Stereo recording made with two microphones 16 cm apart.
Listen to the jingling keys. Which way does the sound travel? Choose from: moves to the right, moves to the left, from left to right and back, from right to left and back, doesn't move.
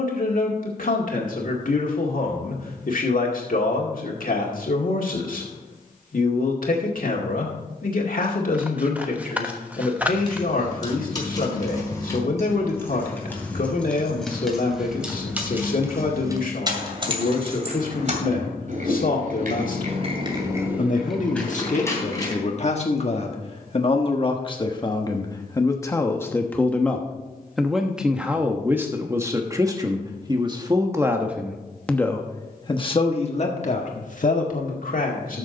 from left to right and back.